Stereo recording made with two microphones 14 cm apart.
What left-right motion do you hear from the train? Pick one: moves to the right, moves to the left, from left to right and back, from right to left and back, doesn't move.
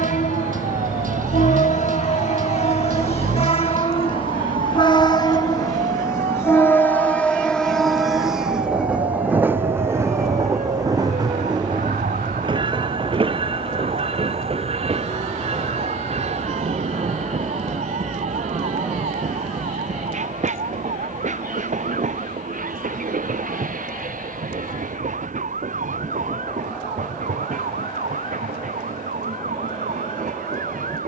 moves to the right.